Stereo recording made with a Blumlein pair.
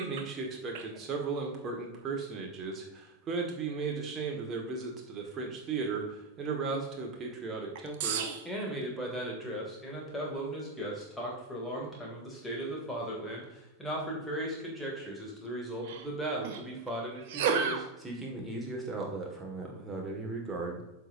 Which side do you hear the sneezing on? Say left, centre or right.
right.